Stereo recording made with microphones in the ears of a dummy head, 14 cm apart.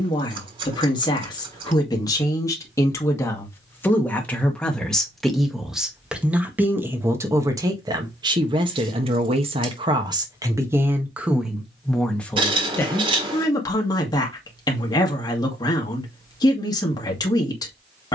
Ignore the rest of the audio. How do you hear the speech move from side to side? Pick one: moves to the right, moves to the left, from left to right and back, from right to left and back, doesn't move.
from left to right and back.